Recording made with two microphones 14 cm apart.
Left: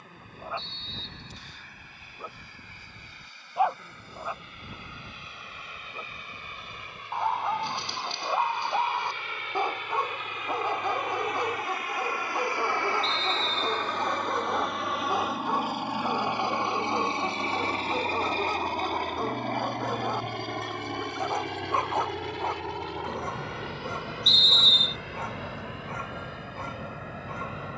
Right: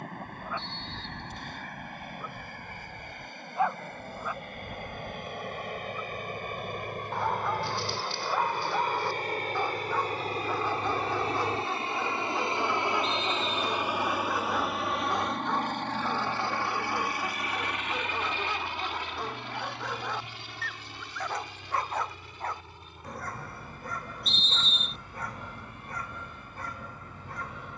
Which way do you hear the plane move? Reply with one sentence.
In this clip you hear the plane go from the right side to the left.